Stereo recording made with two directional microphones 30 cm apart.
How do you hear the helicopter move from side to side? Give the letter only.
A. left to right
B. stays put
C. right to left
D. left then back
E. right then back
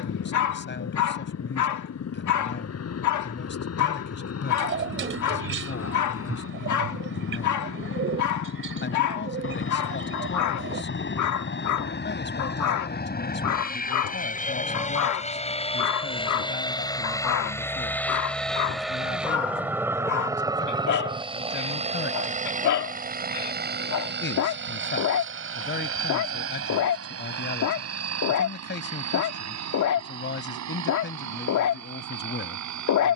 A.